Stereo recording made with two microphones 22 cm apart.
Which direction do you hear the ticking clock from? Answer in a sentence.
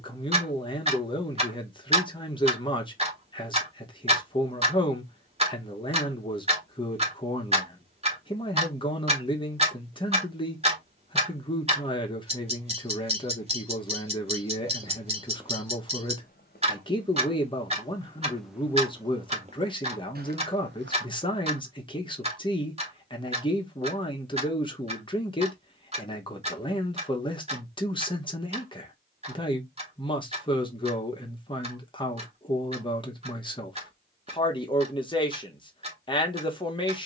You can hear the ticking clock on the right.